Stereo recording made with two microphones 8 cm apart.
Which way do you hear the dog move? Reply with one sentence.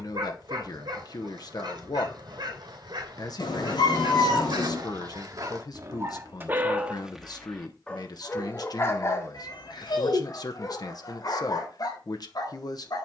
In this clip you hear the dog travel towards the left.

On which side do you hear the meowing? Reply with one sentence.
You can hear the meowing on the left.